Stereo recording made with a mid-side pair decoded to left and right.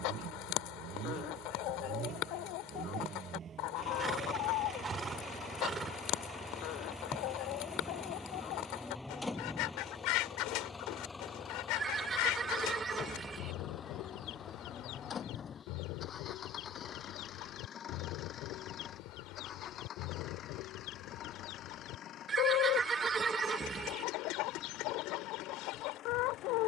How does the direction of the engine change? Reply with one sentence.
You can hear the engine move from right to left.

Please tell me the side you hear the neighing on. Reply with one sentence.
You can hear the neighing on the right.